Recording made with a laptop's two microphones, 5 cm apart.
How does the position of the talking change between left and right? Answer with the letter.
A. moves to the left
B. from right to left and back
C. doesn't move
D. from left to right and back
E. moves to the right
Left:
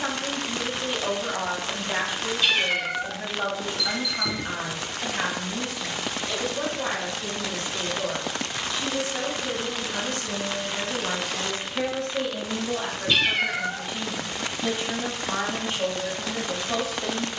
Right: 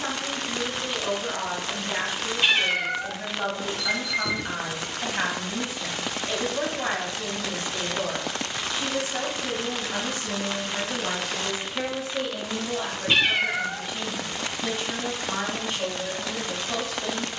D.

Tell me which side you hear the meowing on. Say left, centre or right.
right.